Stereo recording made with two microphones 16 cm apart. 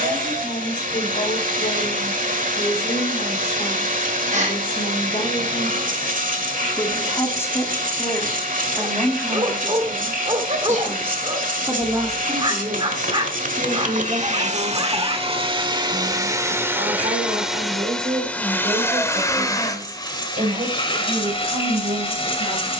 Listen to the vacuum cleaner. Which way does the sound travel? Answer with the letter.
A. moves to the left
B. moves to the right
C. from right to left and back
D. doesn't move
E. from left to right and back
A.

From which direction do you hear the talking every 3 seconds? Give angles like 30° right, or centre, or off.
50° left, 30° left, 10° left, 10° right, 30° right, 50° right, 50° right, 60° right.